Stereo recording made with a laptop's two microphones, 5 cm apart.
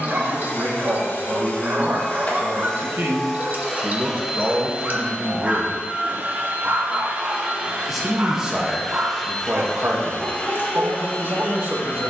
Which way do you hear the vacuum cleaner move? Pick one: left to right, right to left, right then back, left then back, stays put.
right then back.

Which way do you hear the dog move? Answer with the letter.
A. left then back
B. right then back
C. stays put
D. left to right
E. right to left
C.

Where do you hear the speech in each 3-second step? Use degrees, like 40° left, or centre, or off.
70° right, 10° right, 20° right, 60° right.